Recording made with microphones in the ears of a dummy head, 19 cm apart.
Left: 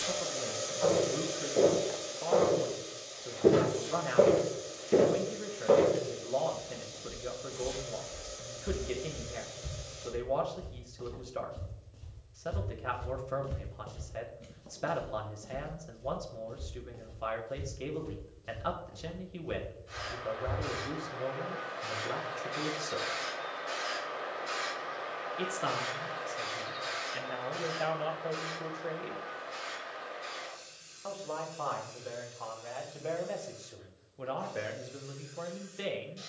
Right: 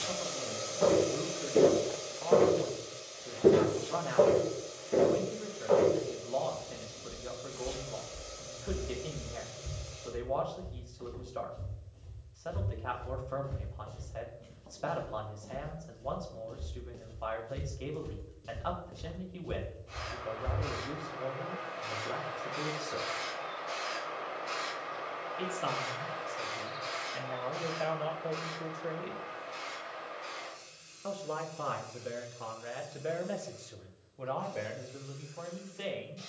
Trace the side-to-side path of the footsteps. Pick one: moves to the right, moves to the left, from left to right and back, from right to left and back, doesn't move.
from right to left and back.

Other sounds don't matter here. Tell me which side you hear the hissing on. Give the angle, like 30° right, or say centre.
10° left.